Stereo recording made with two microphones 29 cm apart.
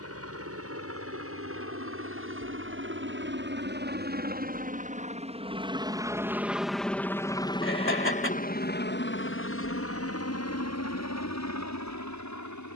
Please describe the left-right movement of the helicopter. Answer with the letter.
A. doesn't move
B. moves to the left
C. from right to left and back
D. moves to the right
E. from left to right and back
B.